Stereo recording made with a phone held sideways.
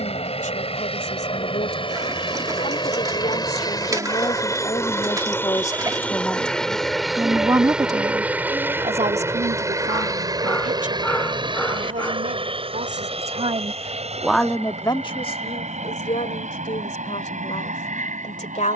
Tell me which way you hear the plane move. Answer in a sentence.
In this clip you hear the plane travel towards the right.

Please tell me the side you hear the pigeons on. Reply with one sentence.
You can hear the pigeons on the right.